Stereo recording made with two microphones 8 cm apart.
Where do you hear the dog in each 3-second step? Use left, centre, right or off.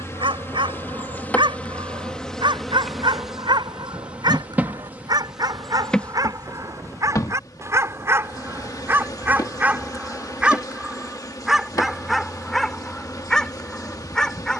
right, right, right, centre, centre.